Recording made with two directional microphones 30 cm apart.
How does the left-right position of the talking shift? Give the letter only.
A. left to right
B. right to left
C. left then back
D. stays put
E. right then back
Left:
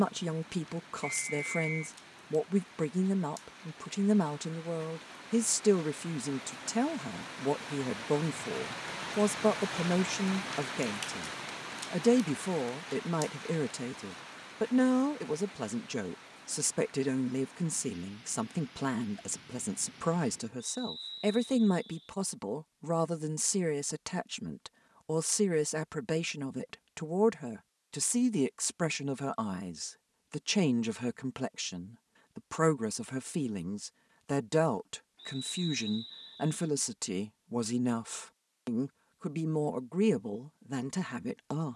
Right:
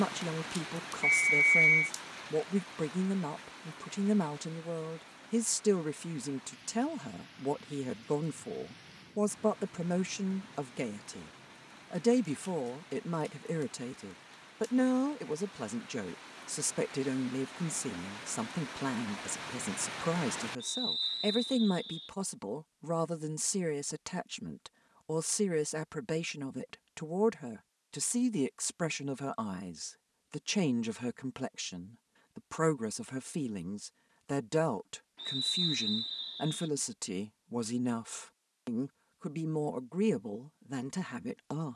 D.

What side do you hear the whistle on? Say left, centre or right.
right.